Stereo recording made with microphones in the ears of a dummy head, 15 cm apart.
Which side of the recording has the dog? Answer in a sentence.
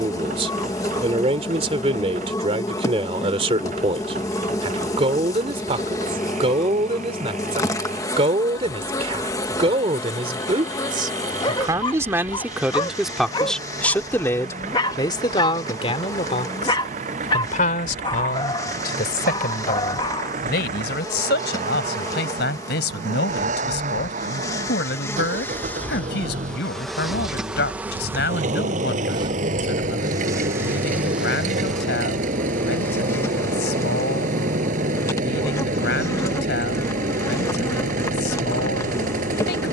In this clip you hear the dog on the left.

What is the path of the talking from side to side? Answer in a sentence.
In this clip you hear the talking move from right to left.